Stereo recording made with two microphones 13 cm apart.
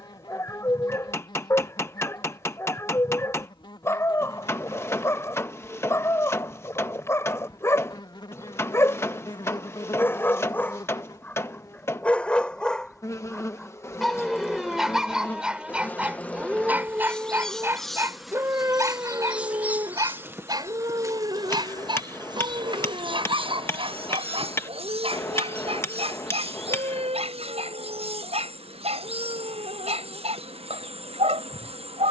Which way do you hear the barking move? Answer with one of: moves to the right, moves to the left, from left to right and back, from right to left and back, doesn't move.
moves to the right.